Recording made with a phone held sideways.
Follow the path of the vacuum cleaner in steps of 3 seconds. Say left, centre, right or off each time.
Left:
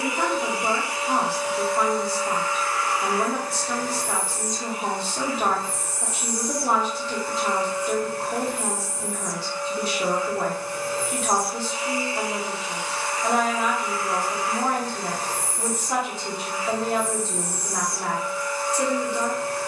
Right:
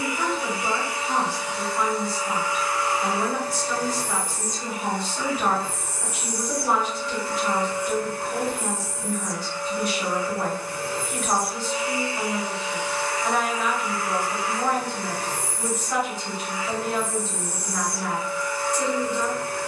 centre, right, right, right, right, right, right.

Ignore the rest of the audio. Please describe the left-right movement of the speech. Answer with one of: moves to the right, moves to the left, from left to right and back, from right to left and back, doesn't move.
doesn't move.